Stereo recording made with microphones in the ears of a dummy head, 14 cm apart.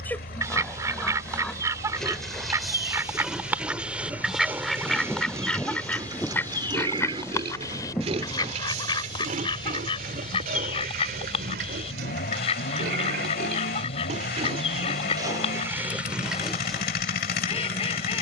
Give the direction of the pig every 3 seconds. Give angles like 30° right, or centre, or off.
10° left, 10° right, 40° right, 60° right, 60° right, 10° right.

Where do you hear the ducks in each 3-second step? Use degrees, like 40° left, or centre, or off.
20° right, centre, 20° left, 40° left, 40° left, 40° left.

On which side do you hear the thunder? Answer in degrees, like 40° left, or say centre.
10° left.